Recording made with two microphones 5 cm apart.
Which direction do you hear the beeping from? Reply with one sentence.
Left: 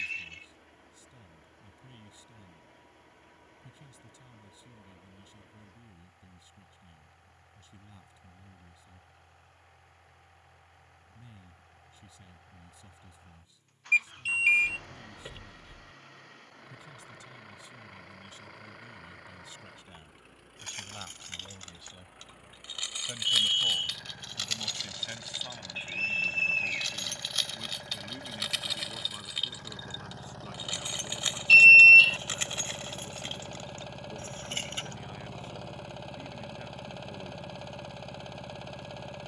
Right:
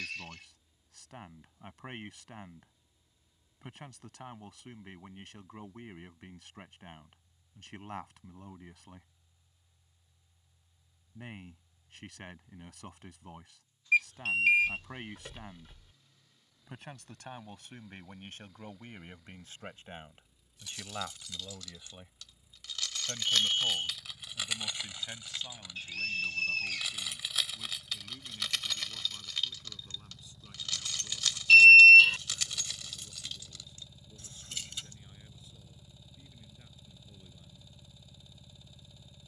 You can hear the beeping in the centre.